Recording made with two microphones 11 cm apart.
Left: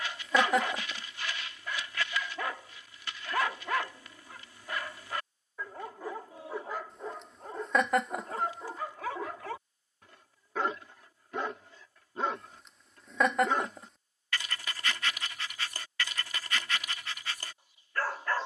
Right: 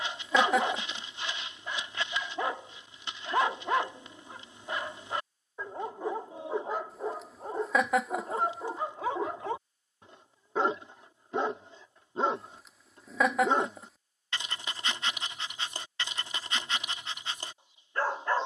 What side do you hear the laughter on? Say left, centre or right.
centre.